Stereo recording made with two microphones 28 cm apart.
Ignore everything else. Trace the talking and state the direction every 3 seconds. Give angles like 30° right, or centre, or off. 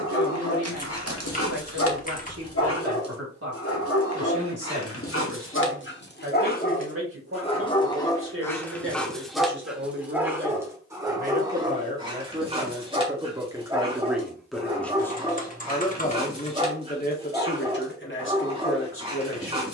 60° right, 60° right, 50° right, 40° right, 10° right, 30° left, 50° left.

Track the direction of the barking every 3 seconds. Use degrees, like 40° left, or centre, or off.
60° left, 50° left, 20° left, 10° right, 20° right, 20° right, 20° right.